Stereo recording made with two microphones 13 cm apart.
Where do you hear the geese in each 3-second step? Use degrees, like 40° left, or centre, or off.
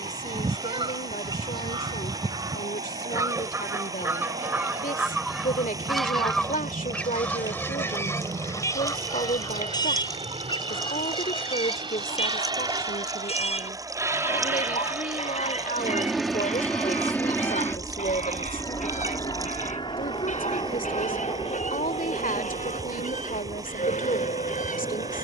40° right, 10° right, 10° left, 30° left, 50° left, 60° left, 60° left, 70° left, 70° left.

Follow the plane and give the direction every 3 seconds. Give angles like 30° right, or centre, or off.
70° right, 60° right, 60° right, 50° right, 30° right, centre, 30° left, 50° left, 60° left.